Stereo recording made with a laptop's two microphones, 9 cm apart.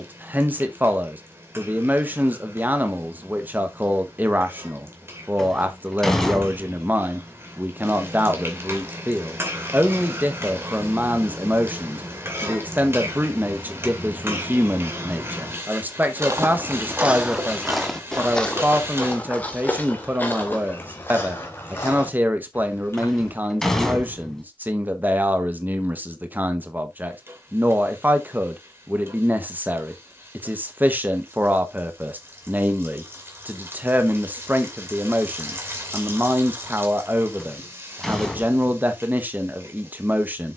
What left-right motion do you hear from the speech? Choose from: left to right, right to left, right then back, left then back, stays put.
stays put.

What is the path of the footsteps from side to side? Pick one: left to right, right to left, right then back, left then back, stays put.
right to left.